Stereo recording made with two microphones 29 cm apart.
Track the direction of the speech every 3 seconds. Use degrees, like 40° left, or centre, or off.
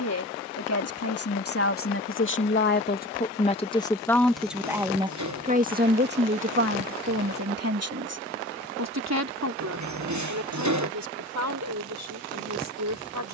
50° left, centre, 50° right, 70° right, 70° right.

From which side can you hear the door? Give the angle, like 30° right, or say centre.
70° right.